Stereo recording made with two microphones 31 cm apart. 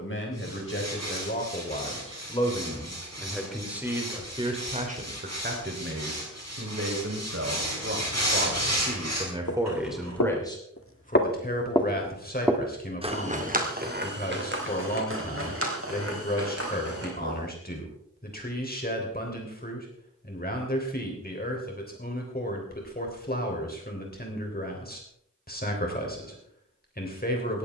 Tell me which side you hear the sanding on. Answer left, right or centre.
right.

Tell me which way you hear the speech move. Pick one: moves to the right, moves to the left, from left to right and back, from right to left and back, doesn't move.
from left to right and back.